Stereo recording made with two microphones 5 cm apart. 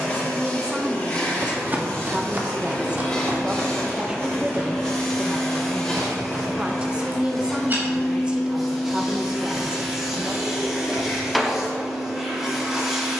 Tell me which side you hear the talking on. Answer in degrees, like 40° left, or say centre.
20° right.